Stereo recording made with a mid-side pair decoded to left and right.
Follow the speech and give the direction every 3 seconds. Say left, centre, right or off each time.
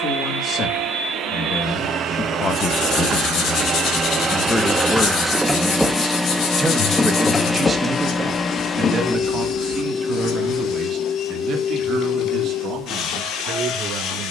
left, centre, right, right, right.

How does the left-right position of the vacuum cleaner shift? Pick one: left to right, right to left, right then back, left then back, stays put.
right to left.